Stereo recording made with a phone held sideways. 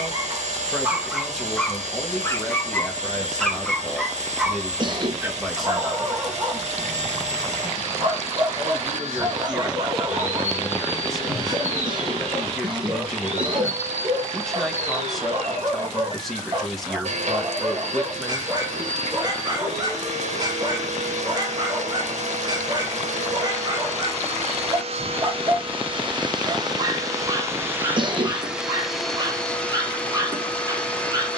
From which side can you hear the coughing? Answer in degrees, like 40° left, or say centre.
40° right.